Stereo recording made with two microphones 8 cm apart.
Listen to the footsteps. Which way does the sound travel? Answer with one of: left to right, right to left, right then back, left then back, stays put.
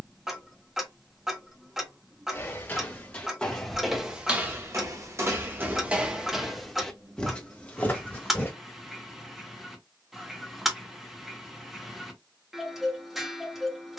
right then back.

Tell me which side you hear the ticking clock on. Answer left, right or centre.
centre.